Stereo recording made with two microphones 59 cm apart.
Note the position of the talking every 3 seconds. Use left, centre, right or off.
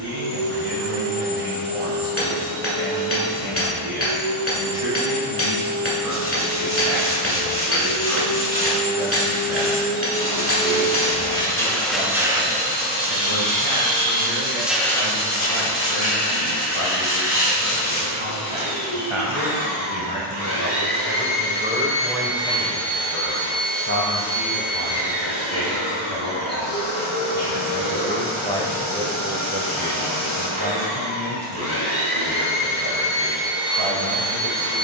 right, right, right, right, right, right, right, centre, left, centre, right, right.